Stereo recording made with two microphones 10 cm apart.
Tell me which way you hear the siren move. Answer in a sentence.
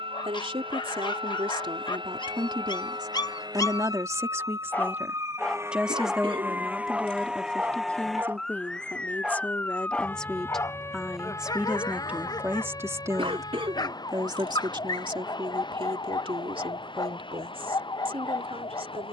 You can hear the siren go from the right side to the left.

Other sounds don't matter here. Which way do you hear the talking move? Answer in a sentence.
In this clip you hear the talking go left and come back.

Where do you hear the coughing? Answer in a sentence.
You can hear the coughing on the right.